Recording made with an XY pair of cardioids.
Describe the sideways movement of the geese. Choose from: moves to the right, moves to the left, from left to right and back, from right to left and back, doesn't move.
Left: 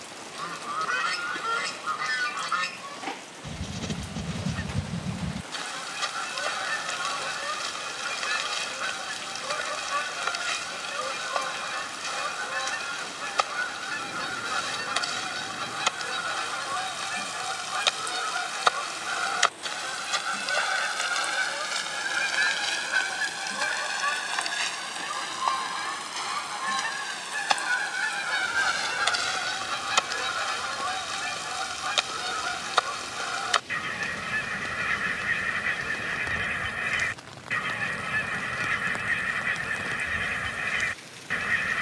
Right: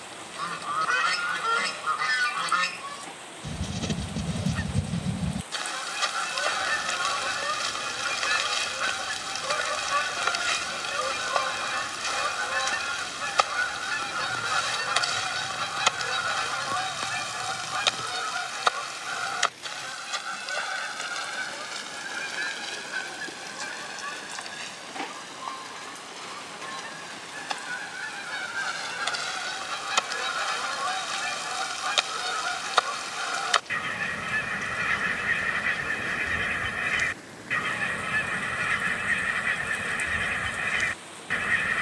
from right to left and back.